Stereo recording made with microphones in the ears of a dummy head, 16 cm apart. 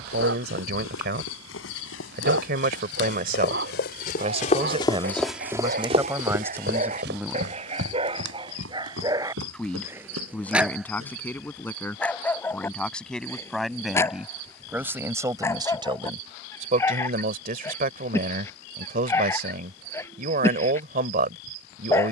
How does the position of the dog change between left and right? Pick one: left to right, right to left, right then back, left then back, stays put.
right to left.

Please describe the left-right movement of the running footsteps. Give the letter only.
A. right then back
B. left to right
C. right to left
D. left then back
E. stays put
B.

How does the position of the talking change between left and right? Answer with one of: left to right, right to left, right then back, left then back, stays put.
left then back.